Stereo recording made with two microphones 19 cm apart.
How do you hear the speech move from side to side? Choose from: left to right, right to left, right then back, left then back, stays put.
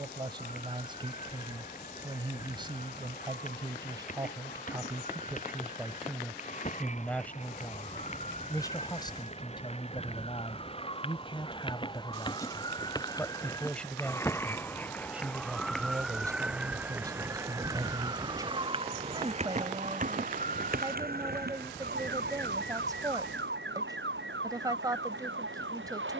left then back.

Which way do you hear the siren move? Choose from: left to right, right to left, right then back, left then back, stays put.
left to right.